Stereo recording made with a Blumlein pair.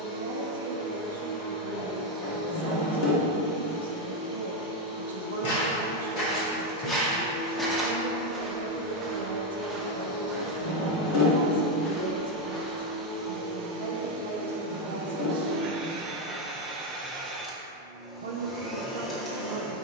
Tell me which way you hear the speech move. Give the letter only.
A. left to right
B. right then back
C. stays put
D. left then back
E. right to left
C.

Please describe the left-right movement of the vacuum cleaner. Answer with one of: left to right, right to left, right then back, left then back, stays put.
right then back.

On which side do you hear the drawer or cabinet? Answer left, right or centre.
left.